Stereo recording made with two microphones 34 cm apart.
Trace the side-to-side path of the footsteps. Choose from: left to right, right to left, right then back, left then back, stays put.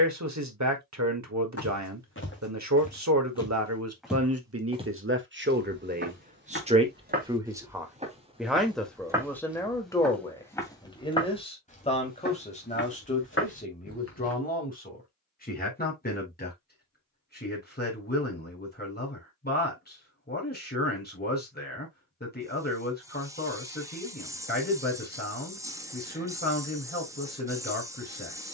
right then back.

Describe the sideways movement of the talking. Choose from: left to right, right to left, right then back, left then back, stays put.
right to left.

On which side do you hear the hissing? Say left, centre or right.
centre.